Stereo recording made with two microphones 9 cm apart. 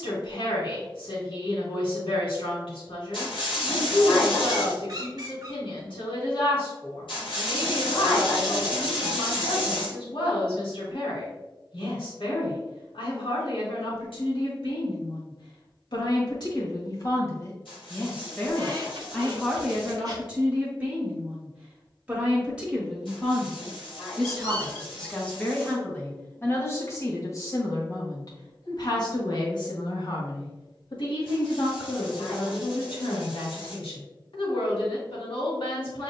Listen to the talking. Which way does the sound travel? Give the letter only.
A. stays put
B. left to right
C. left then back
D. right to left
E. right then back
E.